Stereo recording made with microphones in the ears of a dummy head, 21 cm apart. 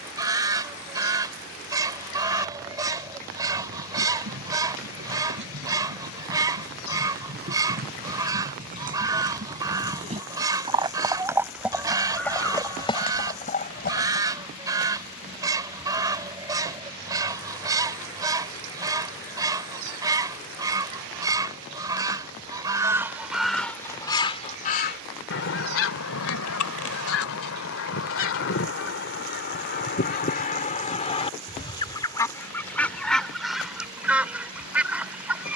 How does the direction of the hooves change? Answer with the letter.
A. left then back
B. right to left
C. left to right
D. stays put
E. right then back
B.